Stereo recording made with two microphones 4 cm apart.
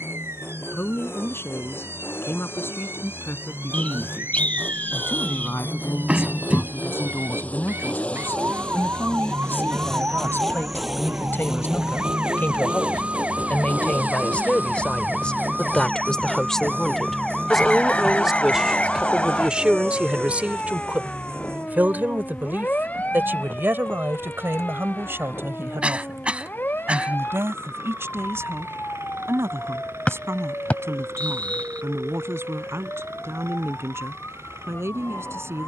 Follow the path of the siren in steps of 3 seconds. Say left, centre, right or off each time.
right, right, right, right, right, centre, left, left, left, left, left, left.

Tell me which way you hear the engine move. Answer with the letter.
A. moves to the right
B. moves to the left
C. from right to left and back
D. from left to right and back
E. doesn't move
A.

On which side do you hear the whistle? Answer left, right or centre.
left.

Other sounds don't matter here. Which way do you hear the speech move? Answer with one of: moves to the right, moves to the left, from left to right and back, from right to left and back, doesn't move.
moves to the right.